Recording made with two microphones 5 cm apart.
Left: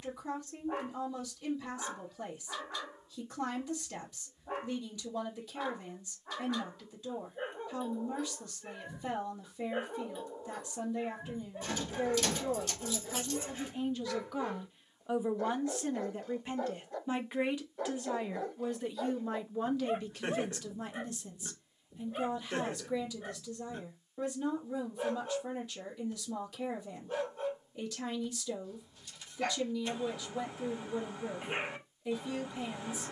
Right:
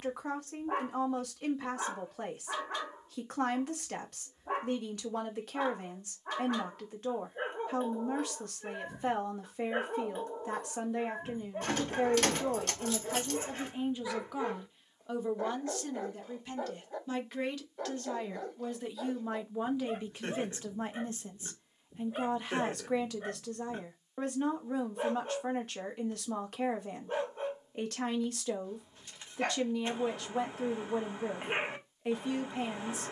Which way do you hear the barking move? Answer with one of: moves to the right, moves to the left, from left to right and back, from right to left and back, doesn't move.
from right to left and back.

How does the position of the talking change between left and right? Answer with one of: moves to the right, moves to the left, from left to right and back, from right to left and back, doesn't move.
from right to left and back.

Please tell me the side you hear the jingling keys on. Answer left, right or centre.
right.